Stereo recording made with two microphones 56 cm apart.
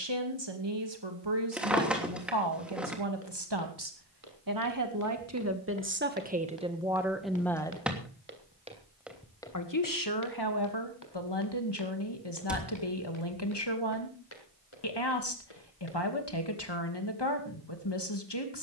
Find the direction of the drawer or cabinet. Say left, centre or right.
centre.